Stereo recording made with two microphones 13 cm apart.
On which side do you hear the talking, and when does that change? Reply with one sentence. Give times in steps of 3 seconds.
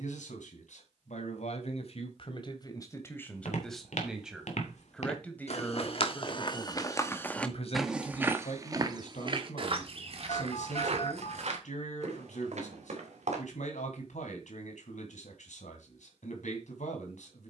In this clip you hear the talking on the left from 0 s, in the centre from 3 s and on the left from 6 s.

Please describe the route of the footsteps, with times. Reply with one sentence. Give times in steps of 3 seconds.
You can hear the footsteps not at all from 0 s, on the left from 3 s, in the centre from 6 s, on the right from 9 s and not at all from 15 s.